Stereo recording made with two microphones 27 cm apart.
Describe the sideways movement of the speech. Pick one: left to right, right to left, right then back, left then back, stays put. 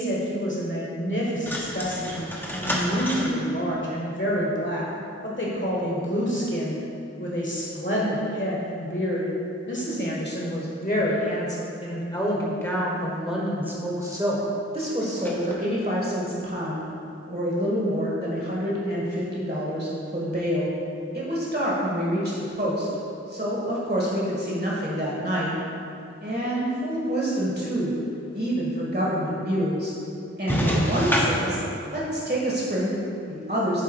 left to right.